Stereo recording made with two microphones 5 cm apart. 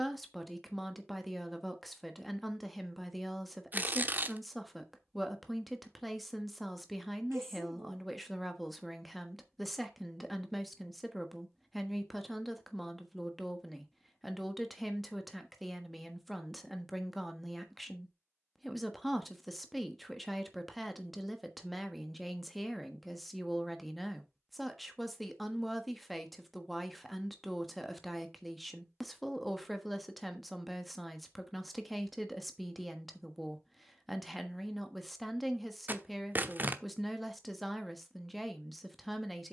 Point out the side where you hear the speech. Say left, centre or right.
centre.